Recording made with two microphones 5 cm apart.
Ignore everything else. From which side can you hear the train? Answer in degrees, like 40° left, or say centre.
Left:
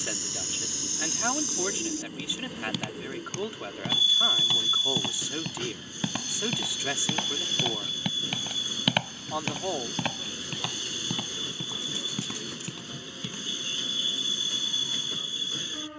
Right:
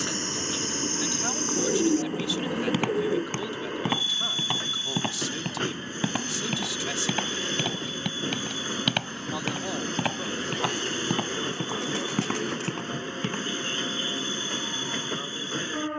40° right.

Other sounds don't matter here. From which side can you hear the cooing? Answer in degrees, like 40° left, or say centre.
60° right.